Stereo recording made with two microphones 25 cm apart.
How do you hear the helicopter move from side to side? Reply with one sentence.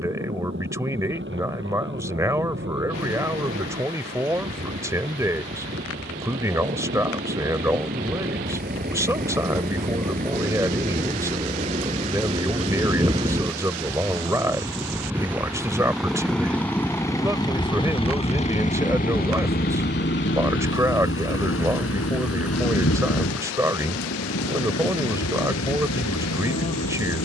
In this clip you hear the helicopter move from right to left.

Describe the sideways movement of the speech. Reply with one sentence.
You can hear the speech stay put.